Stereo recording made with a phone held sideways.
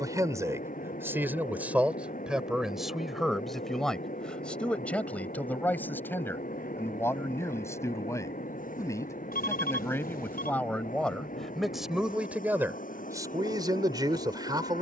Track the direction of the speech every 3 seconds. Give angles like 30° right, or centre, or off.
10° right, 10° left, 20° left, 10° left, 20° right.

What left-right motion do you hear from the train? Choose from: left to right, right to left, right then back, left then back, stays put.
stays put.